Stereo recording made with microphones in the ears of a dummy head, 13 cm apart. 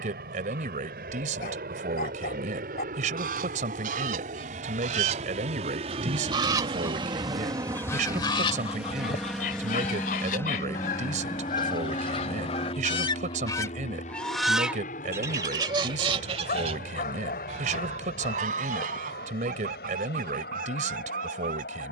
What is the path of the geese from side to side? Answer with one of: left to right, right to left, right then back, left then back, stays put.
left then back.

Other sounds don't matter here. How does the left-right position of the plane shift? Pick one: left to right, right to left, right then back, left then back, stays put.
right to left.